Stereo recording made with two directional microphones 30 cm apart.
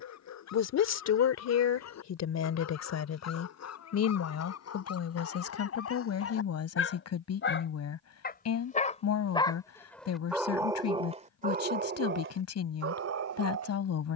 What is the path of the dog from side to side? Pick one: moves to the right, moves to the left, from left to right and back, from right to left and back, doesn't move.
moves to the right.